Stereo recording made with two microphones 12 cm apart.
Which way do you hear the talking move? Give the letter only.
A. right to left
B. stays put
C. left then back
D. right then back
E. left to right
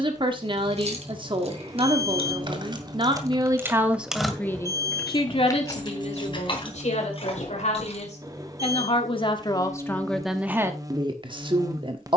C.